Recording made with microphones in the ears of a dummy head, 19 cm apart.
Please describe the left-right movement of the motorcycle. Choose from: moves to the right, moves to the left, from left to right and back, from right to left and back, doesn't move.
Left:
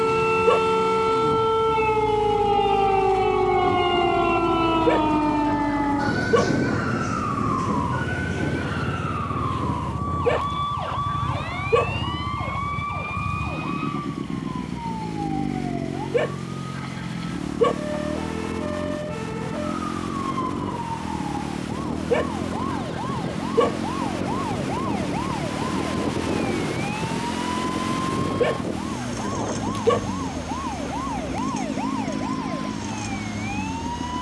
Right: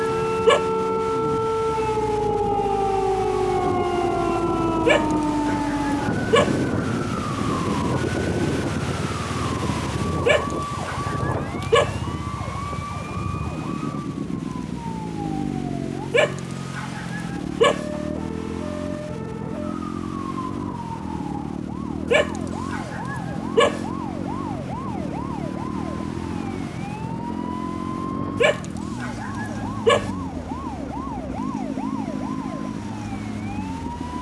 doesn't move.